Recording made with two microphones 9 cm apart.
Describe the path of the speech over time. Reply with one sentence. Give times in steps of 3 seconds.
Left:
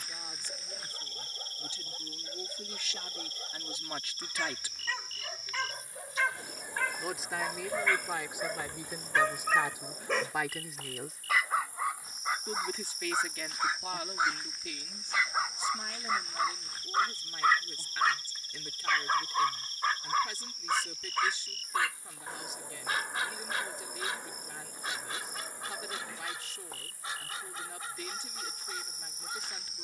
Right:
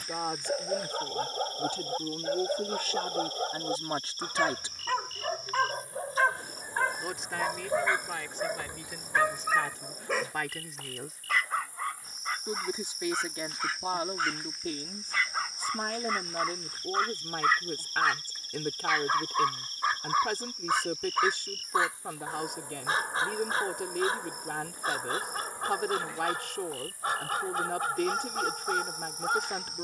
In this clip you hear the speech on the right from 0 s, in the centre from 6 s and on the right from 12 s.